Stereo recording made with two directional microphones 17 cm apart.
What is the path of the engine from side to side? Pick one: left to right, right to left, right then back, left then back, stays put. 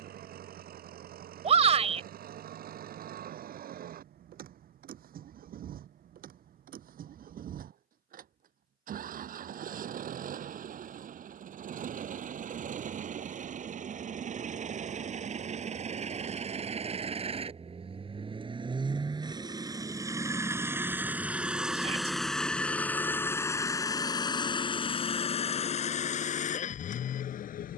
right to left.